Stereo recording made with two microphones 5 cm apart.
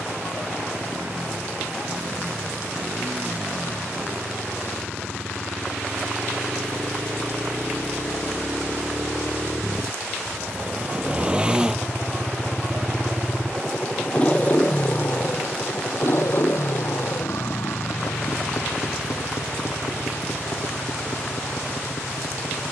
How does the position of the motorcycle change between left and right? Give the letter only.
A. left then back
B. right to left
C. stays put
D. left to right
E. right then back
B.